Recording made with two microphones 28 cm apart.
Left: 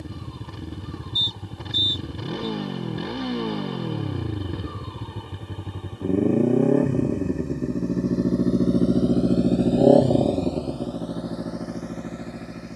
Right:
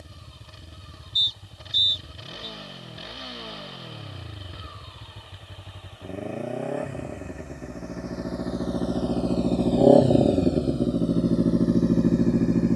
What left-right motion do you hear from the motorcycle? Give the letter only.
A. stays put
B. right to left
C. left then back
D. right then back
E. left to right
E.